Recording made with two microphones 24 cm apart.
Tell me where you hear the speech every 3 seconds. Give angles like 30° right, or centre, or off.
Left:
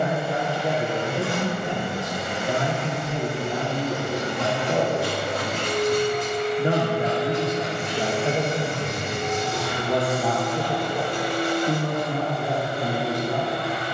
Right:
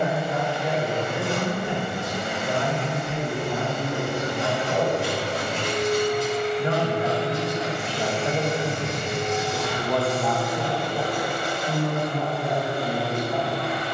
40° left, 40° left, 20° left, 10° left, 40° left.